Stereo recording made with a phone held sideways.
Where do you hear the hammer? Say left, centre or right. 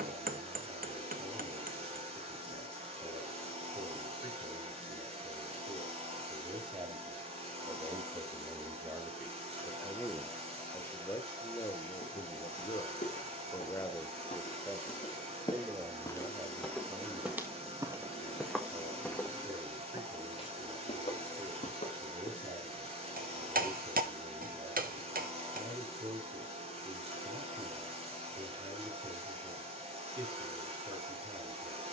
right.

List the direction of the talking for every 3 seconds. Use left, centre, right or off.
right, right, right, centre, left, right, right, right, right, right, right.